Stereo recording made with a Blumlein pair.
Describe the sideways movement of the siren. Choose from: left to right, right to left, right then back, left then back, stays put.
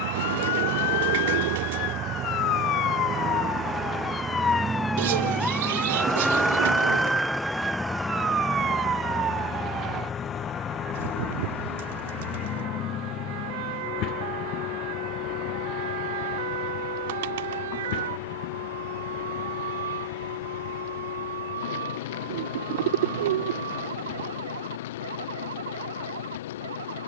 left to right.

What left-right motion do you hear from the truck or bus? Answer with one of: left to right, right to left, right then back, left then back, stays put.
right to left.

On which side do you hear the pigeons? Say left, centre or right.
right.